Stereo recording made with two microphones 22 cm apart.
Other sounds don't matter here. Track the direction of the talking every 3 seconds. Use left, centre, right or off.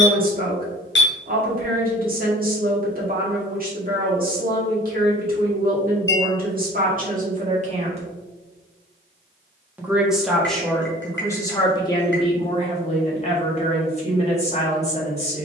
right, right, right, centre, left.